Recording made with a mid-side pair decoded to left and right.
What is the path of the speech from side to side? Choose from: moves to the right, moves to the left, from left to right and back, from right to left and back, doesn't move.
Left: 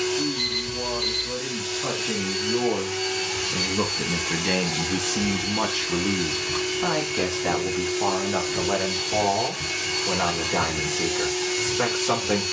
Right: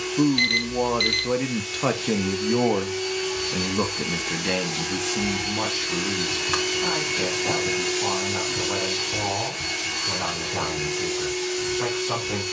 moves to the left.